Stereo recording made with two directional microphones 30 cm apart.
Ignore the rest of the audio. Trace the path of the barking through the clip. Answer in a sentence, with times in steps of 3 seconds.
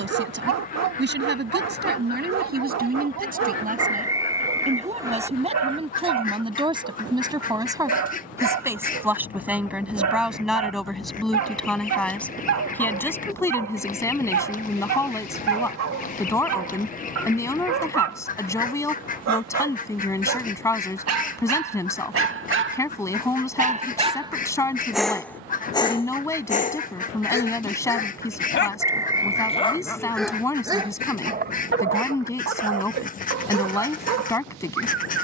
You can hear the barking on the right from 0 s, in the centre from 24 s, on the left from 27 s and on the right from 30 s.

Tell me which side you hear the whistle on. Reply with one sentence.
In this clip you hear the whistle in the centre.